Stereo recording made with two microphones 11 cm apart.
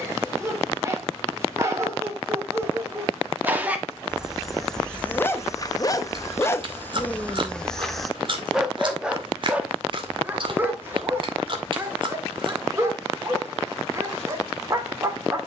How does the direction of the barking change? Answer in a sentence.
You can hear the barking go left and come back.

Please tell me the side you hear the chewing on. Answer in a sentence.
In this clip you hear the chewing on the right.